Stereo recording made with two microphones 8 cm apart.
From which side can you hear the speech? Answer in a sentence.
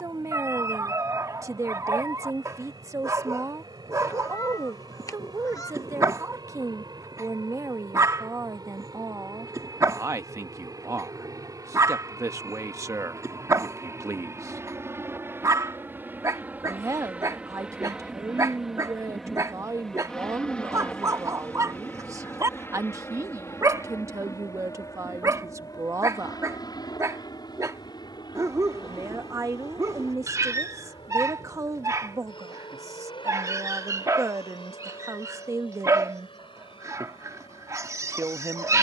You can hear the speech on the right.